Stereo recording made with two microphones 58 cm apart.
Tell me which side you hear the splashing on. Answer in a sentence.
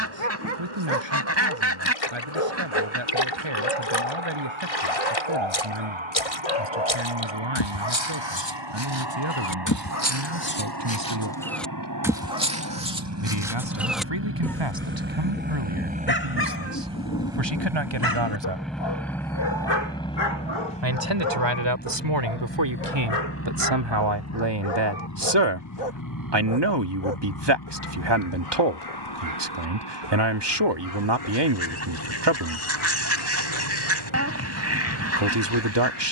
In this clip you hear the splashing on the left.